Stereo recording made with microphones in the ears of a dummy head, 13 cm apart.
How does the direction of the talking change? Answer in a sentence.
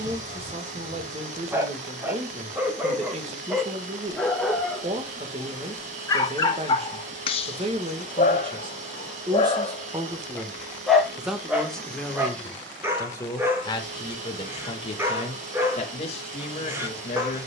You can hear the talking travel towards the left.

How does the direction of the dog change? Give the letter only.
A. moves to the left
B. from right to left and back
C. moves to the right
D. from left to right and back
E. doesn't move
B.